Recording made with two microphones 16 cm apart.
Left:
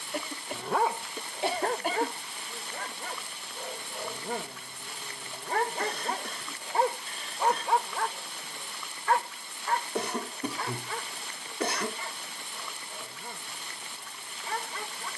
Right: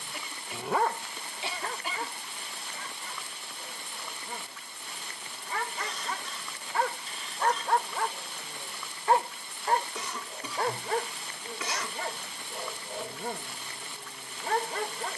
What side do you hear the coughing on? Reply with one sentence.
You can hear the coughing on the left.